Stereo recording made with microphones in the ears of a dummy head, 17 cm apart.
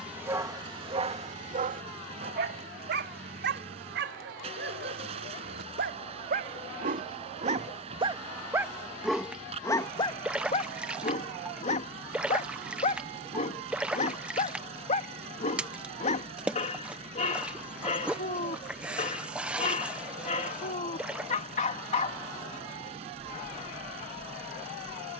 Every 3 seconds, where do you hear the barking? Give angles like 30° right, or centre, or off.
40° right, 60° right, 40° right, 30° left, 40° left, 40° left, 40° left, 40° left, off.